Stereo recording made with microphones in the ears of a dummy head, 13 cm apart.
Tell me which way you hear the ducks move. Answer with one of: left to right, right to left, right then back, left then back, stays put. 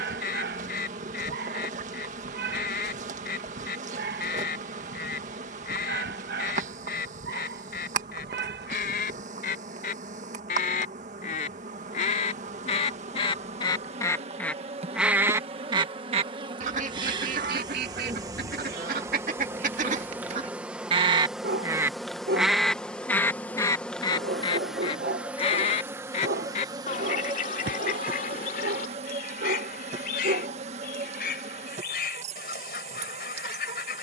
right then back.